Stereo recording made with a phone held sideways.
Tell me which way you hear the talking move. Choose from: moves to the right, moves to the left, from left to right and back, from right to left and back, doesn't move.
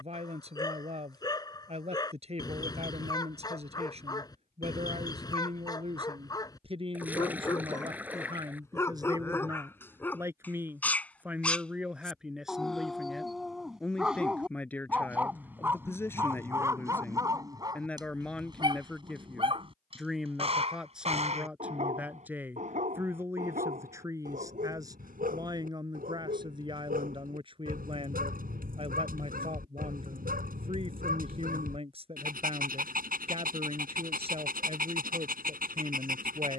from right to left and back.